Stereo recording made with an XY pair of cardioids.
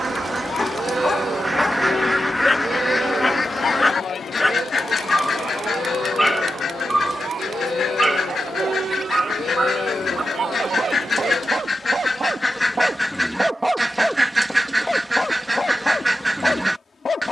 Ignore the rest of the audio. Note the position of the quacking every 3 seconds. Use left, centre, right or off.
centre, left, left, left, centre, centre.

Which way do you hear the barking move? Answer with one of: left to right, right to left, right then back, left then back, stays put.
right then back.